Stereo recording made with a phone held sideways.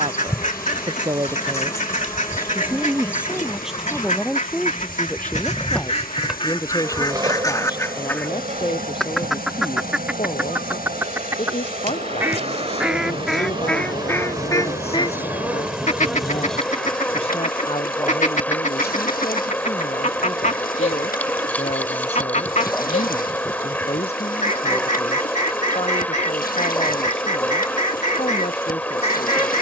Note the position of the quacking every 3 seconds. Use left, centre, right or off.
left, left, left, centre, centre, left, left, left, left, left.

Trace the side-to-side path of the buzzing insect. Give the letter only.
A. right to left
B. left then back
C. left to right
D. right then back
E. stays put
D.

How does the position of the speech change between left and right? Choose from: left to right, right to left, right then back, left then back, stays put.
right to left.